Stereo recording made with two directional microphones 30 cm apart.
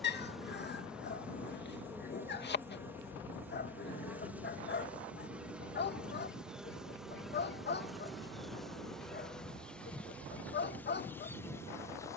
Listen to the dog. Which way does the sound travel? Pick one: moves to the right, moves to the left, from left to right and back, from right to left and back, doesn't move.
doesn't move.